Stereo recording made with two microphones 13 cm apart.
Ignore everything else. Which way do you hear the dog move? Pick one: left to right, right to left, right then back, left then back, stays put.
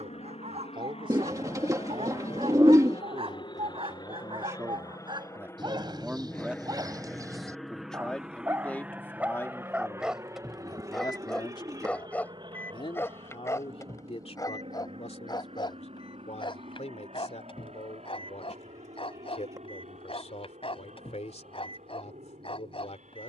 right to left.